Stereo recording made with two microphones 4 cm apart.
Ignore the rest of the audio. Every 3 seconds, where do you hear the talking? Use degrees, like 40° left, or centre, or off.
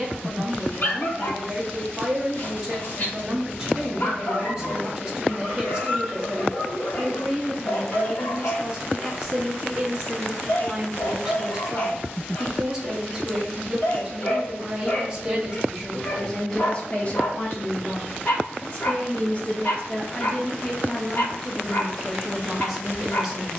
20° right, 20° right, 20° right, 20° right, 20° right, 10° left, 30° left, centre.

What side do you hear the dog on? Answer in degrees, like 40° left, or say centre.
40° left.